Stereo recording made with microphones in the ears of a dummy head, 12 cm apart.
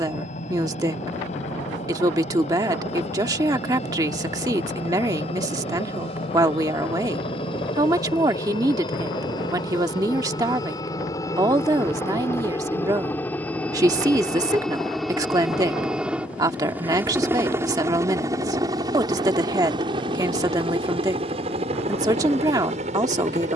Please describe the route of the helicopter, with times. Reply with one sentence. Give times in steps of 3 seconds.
In this clip you hear the helicopter on the left from 0 s, in the centre from 12 s and on the right from 18 s.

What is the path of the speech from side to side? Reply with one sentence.
In this clip you hear the speech stay in one place.